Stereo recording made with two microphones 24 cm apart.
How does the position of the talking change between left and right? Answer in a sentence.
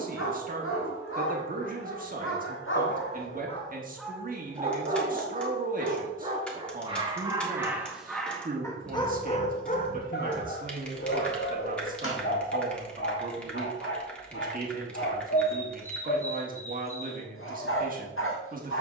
You can hear the talking stay put.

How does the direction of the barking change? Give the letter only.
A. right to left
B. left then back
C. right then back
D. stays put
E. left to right
C.